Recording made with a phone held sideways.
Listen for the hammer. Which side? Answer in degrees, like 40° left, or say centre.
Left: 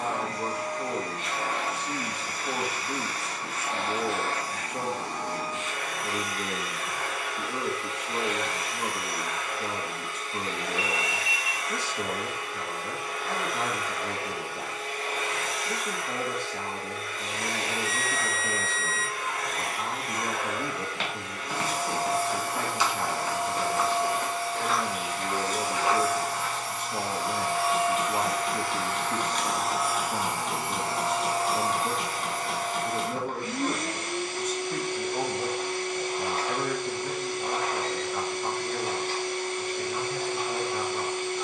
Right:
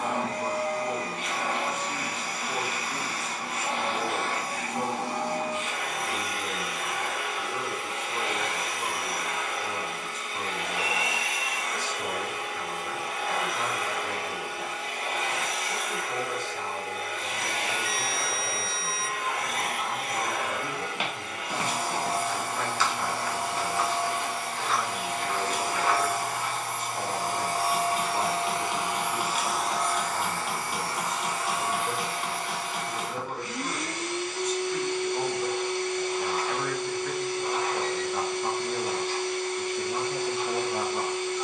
10° right.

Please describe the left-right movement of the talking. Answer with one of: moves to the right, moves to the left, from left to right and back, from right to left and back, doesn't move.
moves to the right.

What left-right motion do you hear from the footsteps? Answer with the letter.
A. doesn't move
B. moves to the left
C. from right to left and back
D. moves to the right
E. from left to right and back
C.